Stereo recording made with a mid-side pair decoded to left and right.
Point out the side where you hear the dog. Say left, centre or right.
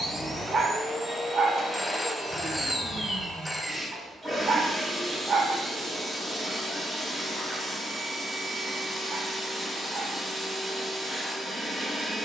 right.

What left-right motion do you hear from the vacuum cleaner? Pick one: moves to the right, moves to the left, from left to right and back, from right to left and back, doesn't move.
doesn't move.